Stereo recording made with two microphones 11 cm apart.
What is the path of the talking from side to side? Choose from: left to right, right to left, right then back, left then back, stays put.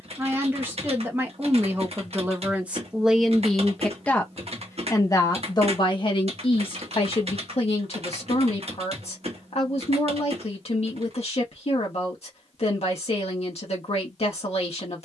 right to left.